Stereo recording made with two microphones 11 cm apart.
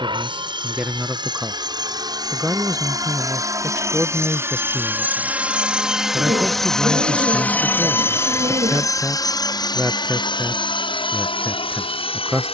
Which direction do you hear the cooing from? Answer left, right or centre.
right.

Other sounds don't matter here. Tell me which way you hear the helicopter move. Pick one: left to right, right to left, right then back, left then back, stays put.
right to left.